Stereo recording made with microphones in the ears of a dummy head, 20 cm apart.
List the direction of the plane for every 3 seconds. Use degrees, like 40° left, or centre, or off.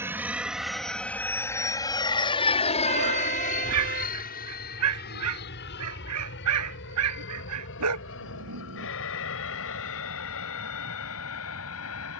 10° left, 40° left, 50° left, 60° left.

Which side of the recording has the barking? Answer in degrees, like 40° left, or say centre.
80° right.